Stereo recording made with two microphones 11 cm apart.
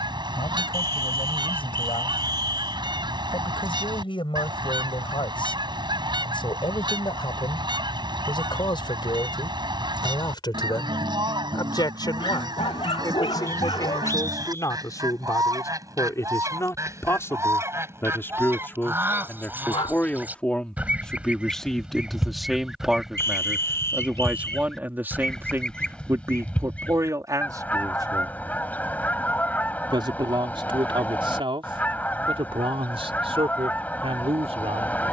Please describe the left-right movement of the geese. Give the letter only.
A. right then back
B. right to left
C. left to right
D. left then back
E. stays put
B.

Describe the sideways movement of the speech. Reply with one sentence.
In this clip you hear the speech travel towards the right.